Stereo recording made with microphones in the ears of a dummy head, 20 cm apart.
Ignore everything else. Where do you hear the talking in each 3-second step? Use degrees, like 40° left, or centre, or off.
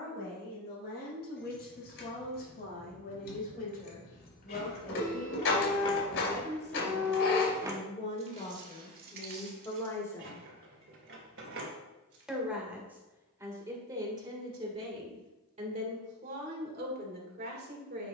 50° left, 40° left, 30° left, 20° left, 20° right, 40° right.